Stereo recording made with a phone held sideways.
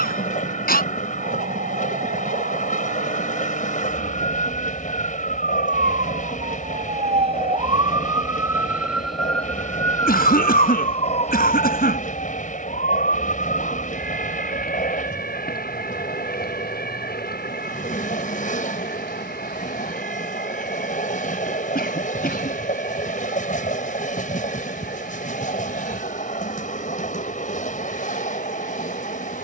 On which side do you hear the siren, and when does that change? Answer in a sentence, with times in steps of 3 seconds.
In this clip you hear the siren on the right from 0 s and on the left from 9 s.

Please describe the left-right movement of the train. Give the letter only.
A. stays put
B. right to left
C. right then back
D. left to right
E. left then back
A.